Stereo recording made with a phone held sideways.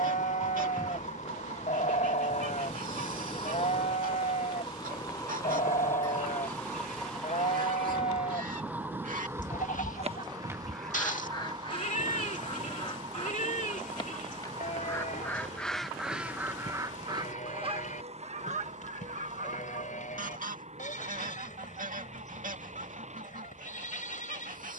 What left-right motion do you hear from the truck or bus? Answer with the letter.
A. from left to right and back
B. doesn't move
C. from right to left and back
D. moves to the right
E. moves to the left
D.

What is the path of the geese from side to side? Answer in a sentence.
In this clip you hear the geese go left and come back.